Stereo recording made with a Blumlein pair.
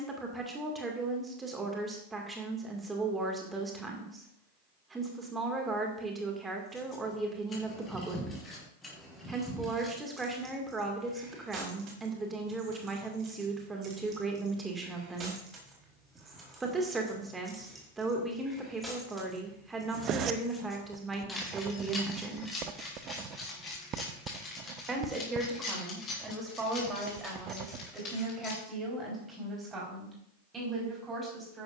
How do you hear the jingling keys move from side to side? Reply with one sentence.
In this clip you hear the jingling keys move from left to right and back again.